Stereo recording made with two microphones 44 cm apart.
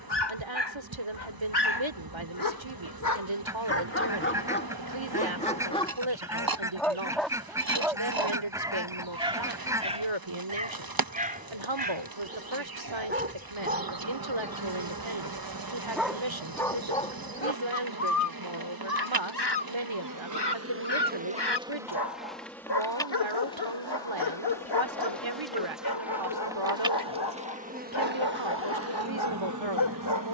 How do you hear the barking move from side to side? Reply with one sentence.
You can hear the barking move from left to right and back again.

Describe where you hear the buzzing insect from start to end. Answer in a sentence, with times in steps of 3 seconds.
In this clip you hear the buzzing insect on the right from 0 s, in the centre from 21 s and on the right from 27 s.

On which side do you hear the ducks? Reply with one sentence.
You can hear the ducks in the centre.